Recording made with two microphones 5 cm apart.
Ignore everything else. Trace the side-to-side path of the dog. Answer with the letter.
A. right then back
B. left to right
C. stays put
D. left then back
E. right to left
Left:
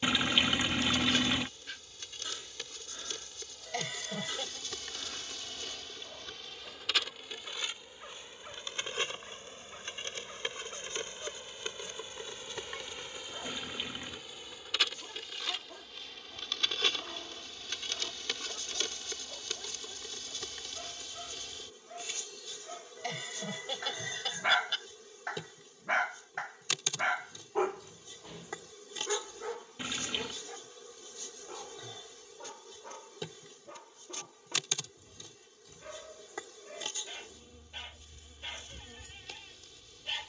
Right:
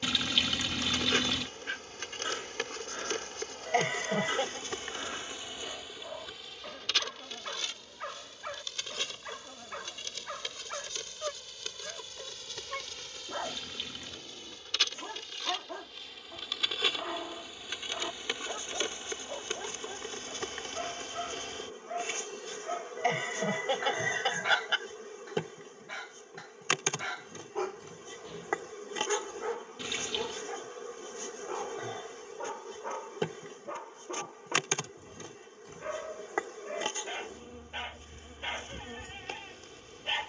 D.